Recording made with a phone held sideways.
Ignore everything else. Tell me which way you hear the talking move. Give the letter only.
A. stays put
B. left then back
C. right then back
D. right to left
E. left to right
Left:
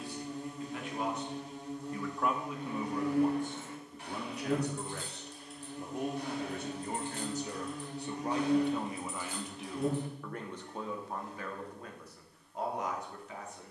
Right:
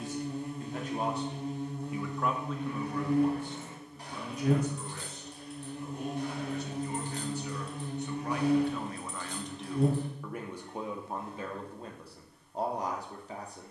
B.